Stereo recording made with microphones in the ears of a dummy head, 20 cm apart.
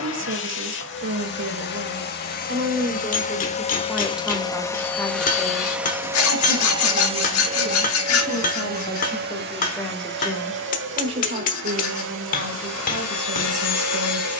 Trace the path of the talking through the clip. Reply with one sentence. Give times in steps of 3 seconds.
In this clip you hear the talking on the right from 0 s, in the centre from 3 s, on the left from 6 s, in the centre from 9 s and on the right from 12 s.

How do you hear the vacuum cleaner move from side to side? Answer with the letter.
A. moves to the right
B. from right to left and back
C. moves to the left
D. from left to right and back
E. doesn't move
A.